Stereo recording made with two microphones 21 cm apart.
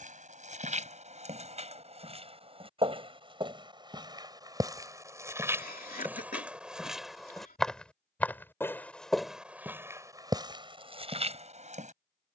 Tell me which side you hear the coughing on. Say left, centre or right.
left.